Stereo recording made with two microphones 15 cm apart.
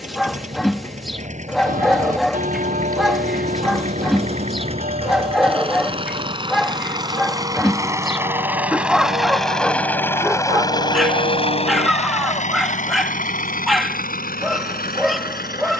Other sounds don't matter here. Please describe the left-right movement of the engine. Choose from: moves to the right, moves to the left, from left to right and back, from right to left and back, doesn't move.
moves to the left.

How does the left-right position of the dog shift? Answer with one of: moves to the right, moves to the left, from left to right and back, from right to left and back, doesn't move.
doesn't move.